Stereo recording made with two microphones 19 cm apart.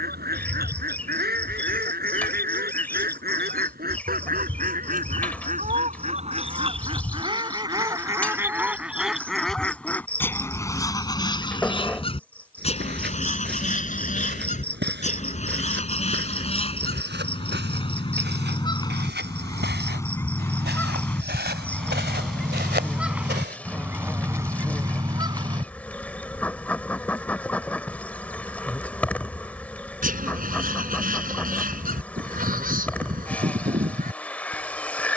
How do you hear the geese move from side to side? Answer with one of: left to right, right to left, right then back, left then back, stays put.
left then back.